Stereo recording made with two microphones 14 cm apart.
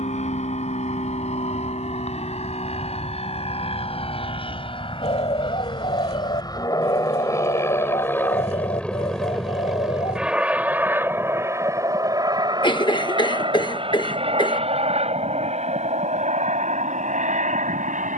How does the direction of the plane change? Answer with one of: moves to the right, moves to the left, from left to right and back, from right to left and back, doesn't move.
moves to the right.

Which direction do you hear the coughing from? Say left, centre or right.
left.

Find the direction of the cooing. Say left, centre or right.
left.